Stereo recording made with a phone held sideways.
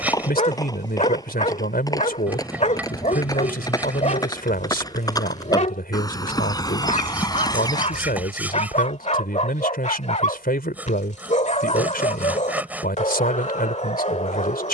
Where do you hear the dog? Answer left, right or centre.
left.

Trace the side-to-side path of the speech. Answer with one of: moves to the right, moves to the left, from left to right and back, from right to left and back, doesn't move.
doesn't move.